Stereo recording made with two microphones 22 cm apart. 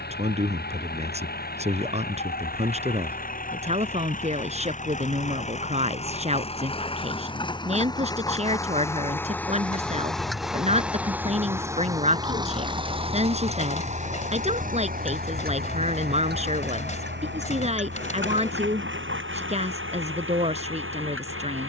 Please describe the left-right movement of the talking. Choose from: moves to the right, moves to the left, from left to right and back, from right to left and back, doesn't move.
doesn't move.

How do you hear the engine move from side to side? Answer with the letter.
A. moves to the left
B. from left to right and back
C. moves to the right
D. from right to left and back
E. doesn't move
C.